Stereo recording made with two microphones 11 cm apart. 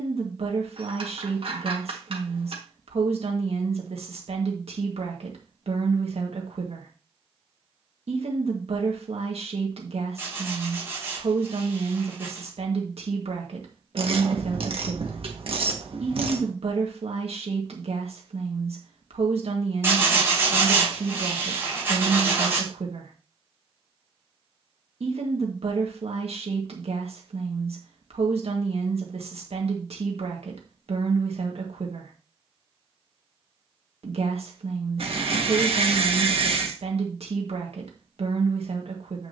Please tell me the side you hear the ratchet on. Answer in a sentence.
You can hear the ratchet on the right.